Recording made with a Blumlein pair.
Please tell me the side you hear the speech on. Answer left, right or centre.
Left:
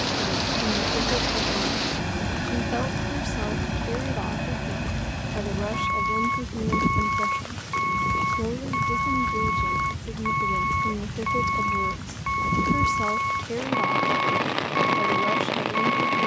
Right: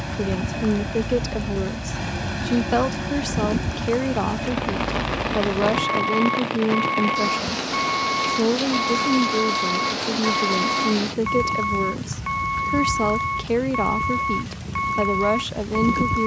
right.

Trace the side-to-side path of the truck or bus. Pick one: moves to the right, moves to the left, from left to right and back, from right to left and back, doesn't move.
doesn't move.